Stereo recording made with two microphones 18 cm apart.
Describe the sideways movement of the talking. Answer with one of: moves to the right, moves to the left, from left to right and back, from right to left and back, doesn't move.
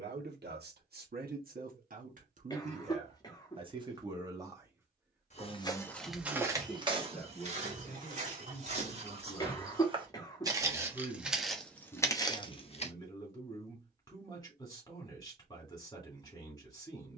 moves to the left.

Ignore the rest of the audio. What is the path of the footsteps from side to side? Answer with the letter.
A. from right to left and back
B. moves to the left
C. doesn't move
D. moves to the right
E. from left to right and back
E.